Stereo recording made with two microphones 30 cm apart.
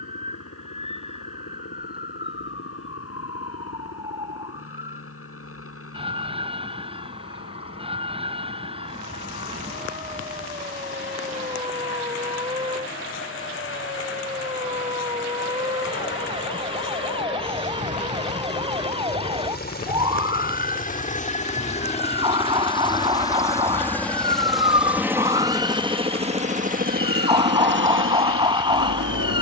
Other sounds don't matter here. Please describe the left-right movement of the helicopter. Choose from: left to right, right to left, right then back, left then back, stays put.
left to right.